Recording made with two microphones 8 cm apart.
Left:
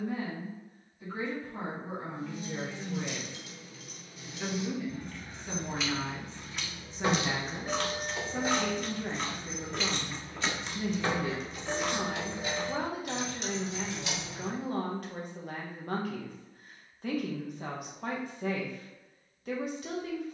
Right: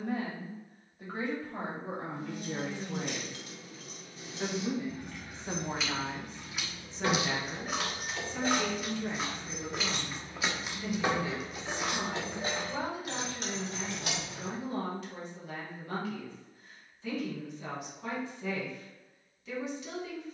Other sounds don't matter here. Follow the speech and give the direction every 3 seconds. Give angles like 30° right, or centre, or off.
60° right, 40° right, 20° left, 50° left, 50° left, 50° left, 50° left.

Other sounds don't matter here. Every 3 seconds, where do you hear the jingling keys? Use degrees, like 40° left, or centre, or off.
60° right, 30° right, 10° left, 10° right, 50° right, off, off.